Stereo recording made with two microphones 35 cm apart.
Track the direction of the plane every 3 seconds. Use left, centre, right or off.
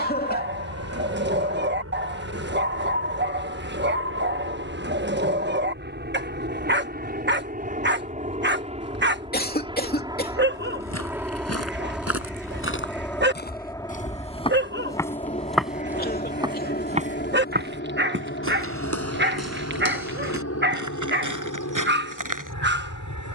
right, right, right, centre, centre, left, left, left.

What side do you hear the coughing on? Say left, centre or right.
left.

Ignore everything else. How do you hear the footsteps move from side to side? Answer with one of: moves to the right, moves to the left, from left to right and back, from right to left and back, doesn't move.
moves to the right.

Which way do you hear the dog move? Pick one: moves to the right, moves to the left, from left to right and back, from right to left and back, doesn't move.
doesn't move.